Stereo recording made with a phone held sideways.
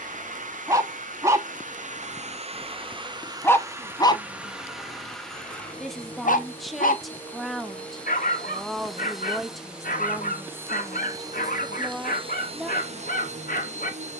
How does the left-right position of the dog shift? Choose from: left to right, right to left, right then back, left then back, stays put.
right to left.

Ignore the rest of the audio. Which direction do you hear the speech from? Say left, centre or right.
centre.